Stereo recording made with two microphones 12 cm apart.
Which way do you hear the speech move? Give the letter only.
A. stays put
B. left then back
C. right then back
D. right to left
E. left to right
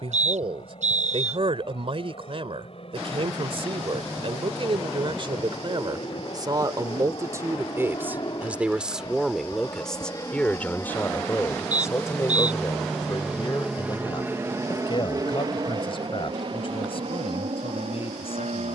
D.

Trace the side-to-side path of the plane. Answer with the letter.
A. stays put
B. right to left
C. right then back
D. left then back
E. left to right
E.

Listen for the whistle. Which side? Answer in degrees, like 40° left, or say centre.
80° right.